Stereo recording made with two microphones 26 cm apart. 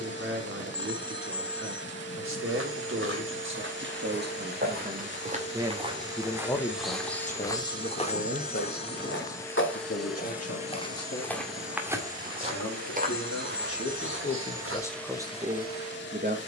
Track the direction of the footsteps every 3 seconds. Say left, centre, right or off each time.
right, right, centre, left, right, off.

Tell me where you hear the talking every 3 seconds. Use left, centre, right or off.
right, right, left, left, left, right.